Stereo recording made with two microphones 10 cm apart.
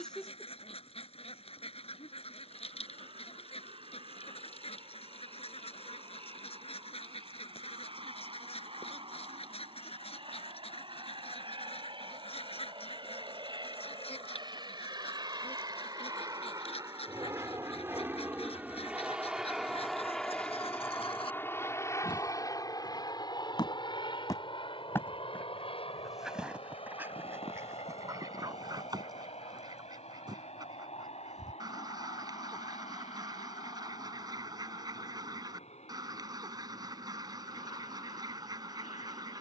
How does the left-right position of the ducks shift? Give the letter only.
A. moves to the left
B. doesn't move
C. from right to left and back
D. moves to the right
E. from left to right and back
D.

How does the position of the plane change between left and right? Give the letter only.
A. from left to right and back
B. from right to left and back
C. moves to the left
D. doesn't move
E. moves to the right
C.